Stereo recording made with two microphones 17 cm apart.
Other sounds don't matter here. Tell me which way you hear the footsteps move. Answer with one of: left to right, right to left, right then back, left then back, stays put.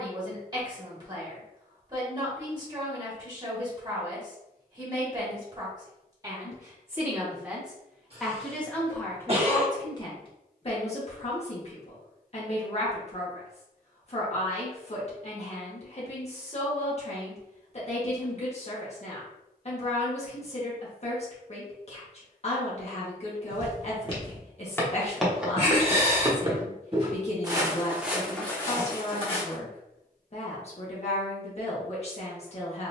right then back.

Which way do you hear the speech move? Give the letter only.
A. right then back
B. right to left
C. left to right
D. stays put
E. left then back
B.